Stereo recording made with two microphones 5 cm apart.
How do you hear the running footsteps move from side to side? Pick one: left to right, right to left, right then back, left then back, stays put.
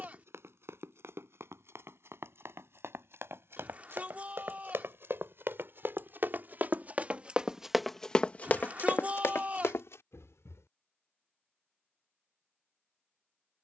right to left.